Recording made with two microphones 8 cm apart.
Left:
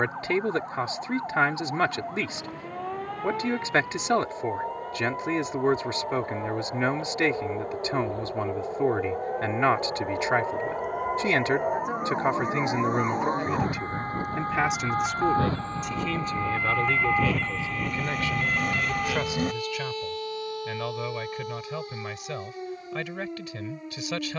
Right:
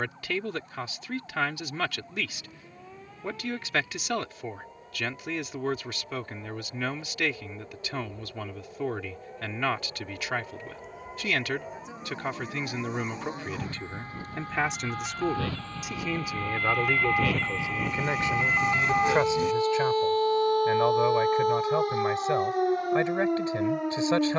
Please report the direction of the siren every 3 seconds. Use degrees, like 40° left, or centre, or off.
70° left, 70° left, 70° left, 60° left, 50° left, 20° left, 30° right, 60° right.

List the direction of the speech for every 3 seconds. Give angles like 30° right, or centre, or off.
30° left, 30° left, 30° left, 30° left, 20° left, 10° right, 30° right, 30° right.